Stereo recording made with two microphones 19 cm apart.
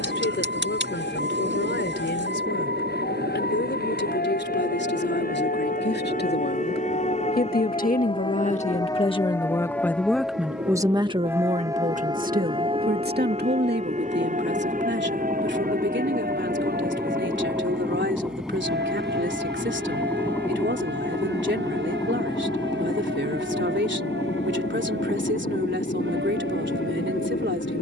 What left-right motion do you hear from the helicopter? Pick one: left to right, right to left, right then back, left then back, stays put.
right to left.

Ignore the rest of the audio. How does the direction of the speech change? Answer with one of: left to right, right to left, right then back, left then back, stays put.
left to right.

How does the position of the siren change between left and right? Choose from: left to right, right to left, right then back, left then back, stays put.
left to right.